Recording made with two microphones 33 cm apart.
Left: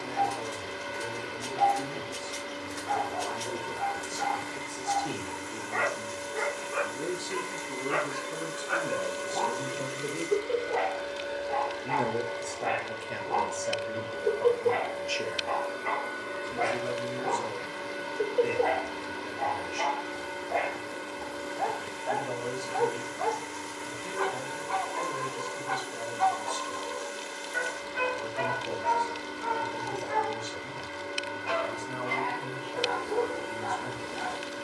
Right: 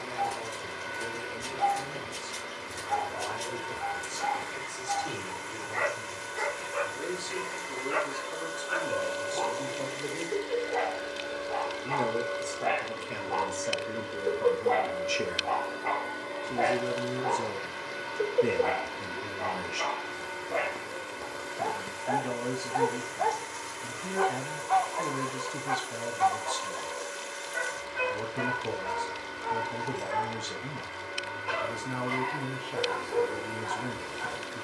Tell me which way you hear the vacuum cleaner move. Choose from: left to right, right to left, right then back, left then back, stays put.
right then back.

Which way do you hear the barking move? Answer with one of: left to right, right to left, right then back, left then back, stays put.
right then back.